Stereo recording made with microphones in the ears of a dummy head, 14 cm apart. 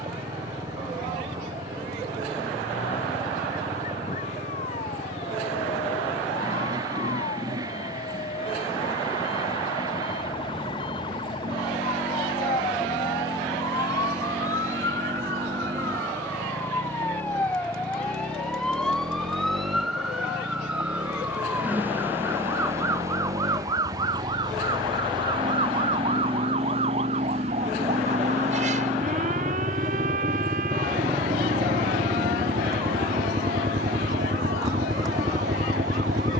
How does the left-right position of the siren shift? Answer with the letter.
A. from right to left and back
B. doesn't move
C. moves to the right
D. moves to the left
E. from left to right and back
C.